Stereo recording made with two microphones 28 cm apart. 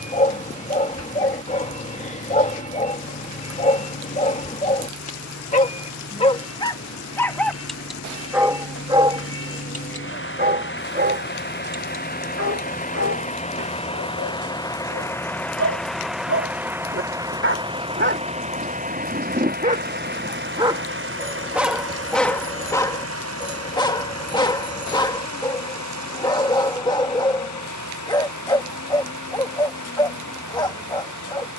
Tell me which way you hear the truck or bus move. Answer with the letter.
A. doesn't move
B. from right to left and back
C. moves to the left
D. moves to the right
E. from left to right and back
D.